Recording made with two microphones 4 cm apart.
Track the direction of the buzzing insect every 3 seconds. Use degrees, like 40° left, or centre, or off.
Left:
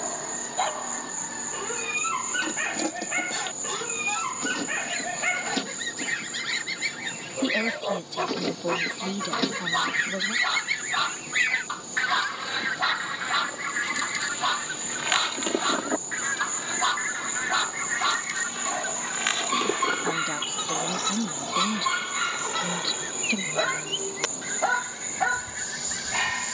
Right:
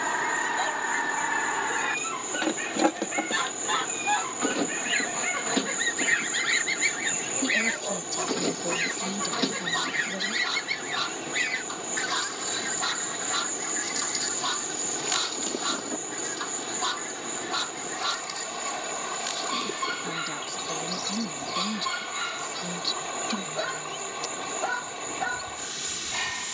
50° left, 40° left, 20° left, centre, 20° left, 50° left, 60° left, 60° left, 60° left.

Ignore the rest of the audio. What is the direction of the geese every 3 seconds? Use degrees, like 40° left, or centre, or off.
50° right, 30° right, 10° right, 10° left, 30° left, 50° left, 50° left, 60° left, 60° left.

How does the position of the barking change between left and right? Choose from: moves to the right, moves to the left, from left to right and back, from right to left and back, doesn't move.
doesn't move.